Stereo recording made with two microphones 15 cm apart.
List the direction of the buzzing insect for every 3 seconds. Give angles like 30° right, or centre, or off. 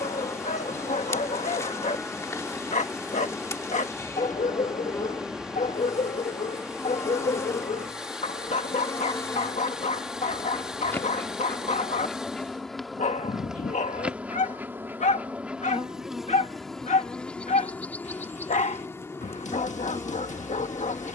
20° left, 20° left, 20° left, 10° left, centre, centre, 20° left.